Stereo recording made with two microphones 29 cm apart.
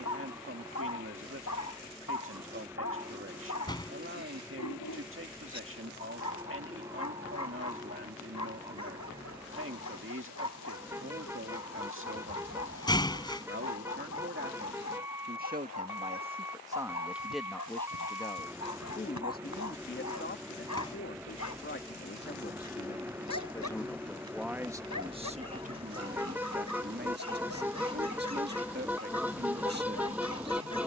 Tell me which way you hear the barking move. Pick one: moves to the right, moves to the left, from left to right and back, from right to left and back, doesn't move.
doesn't move.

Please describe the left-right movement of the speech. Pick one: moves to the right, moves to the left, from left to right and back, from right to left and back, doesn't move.
from right to left and back.